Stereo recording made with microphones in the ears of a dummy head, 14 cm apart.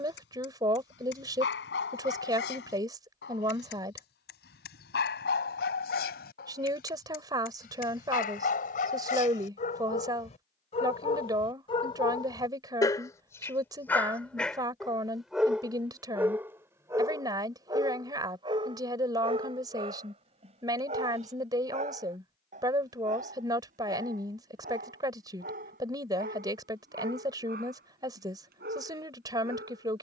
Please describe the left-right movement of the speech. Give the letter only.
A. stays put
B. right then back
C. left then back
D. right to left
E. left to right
A.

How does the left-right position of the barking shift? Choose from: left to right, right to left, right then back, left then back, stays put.
left to right.